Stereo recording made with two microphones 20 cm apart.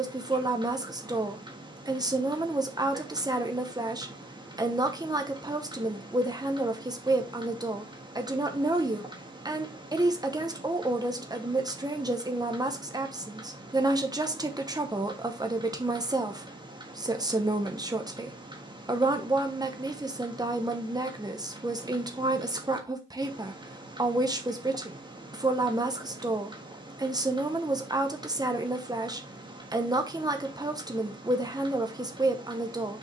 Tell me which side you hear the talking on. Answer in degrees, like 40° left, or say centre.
20° right.